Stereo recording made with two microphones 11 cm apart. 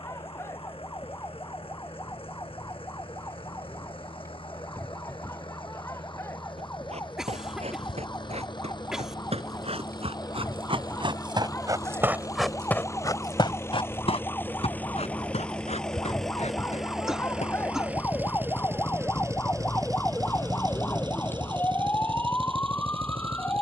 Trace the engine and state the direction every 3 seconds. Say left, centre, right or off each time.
left, left, left, left, left, centre, right, right.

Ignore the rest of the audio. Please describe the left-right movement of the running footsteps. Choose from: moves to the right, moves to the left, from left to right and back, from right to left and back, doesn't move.
moves to the left.